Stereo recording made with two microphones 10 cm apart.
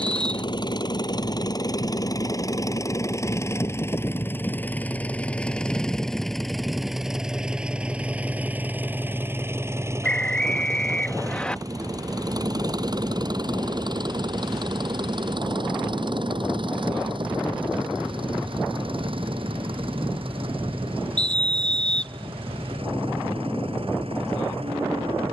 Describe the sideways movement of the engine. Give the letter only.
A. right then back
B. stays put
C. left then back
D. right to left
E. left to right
E.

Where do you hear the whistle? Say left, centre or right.
centre.